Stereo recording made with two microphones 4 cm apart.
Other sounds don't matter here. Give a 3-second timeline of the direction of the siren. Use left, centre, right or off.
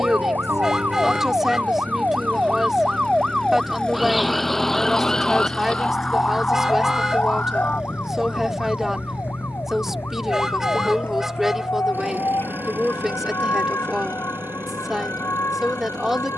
right, centre, left, left, left, left.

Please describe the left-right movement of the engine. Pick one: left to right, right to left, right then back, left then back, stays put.
left to right.